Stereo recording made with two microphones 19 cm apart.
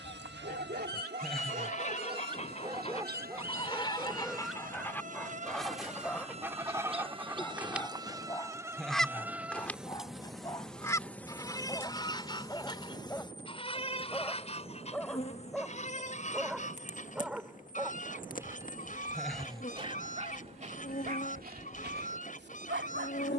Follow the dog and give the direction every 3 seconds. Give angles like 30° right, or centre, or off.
40° right, centre, 10° left, 20° left, 10° left, centre, 30° right, 60° right.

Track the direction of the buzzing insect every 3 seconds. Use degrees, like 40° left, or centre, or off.
60° right, 40° right, 20° right, centre, 20° left, 40° left, 50° left, 50° left.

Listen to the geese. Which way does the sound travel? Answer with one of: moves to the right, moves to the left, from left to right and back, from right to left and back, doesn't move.
from left to right and back.